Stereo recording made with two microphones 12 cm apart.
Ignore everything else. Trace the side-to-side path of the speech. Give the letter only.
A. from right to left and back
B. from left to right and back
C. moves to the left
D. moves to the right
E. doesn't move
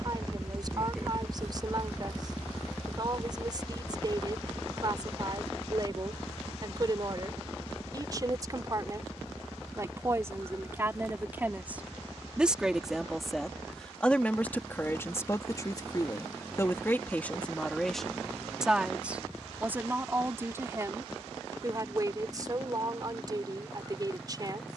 A.